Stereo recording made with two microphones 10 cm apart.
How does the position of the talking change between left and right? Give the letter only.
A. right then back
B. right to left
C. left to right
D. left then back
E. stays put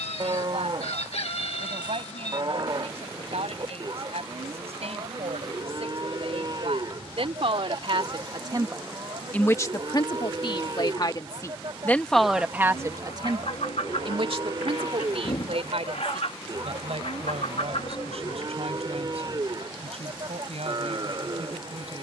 D.